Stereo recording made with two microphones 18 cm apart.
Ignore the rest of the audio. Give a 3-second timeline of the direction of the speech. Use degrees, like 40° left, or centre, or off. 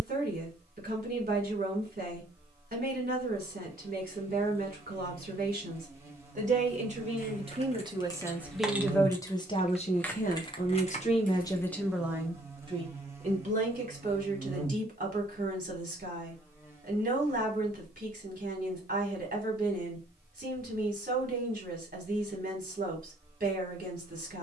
50° right, 50° right, 30° right, 30° left, 40° right, 50° right, 50° right, 50° right.